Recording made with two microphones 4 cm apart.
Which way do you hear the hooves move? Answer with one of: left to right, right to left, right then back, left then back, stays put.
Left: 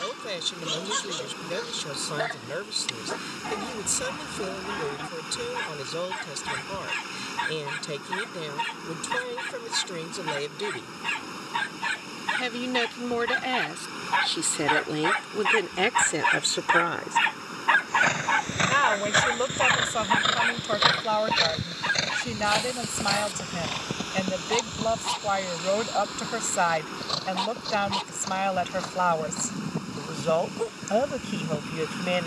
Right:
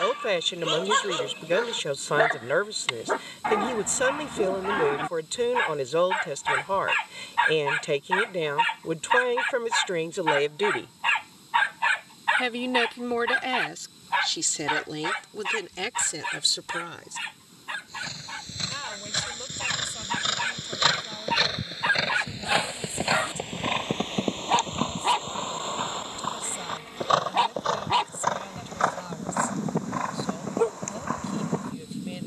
left to right.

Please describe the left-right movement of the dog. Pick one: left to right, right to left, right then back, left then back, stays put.
left then back.